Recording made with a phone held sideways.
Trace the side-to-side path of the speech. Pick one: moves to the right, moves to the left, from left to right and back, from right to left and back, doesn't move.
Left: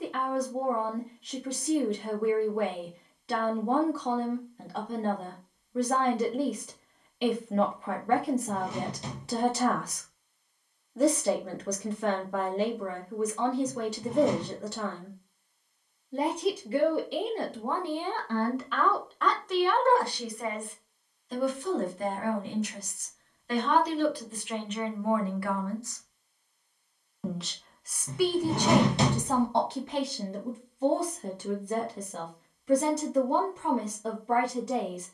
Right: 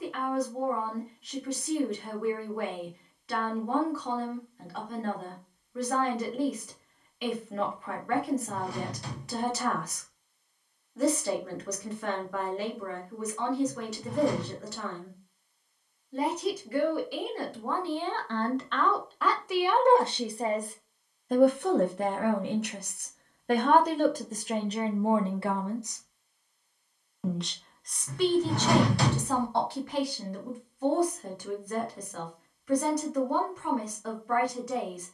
from left to right and back.